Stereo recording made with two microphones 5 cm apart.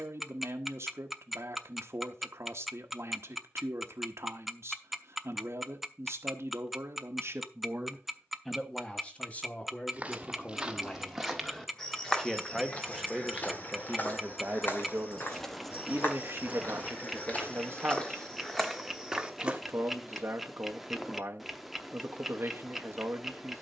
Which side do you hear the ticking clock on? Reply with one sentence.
In this clip you hear the ticking clock in the centre.